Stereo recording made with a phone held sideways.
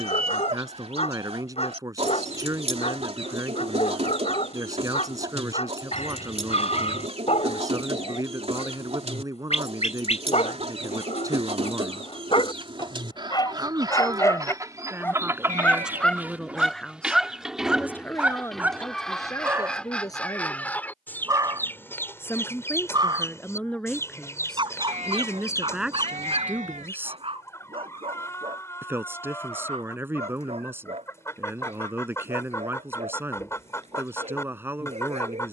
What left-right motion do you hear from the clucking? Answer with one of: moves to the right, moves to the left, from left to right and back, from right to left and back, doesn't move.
moves to the left.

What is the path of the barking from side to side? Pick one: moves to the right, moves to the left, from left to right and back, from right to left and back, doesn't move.
moves to the right.